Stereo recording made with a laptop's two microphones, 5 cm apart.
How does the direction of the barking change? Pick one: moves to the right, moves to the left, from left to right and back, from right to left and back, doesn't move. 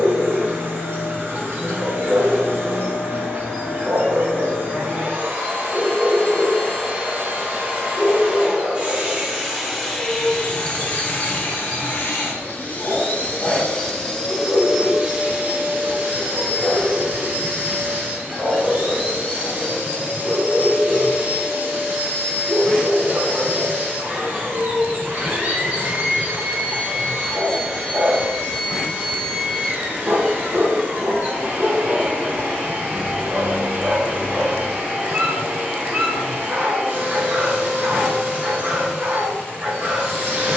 from right to left and back.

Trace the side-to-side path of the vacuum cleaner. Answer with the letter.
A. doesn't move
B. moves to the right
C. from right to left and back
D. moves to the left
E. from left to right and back
C.